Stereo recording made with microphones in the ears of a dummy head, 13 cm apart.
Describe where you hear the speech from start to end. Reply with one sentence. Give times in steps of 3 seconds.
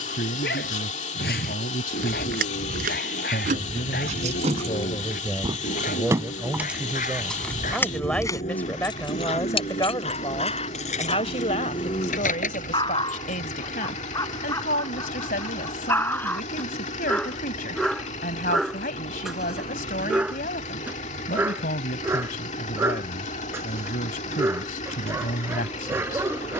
You can hear the speech on the left from 0 s, in the centre from 6 s and on the left from 9 s.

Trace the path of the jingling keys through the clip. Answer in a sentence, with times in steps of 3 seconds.
You can hear the jingling keys on the right from 0 s, in the centre from 6 s, on the left from 9 s and not at all from 15 s.